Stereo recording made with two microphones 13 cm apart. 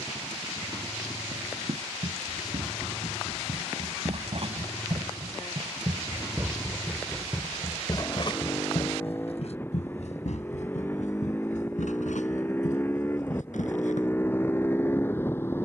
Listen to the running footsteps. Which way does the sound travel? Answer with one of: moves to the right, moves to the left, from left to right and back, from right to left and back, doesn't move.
moves to the left.